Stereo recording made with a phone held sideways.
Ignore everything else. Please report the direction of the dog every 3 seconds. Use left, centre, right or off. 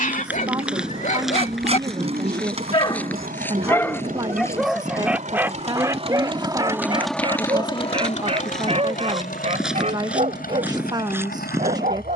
left, centre, right, right.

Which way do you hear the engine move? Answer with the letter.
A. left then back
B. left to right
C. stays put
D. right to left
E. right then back
D.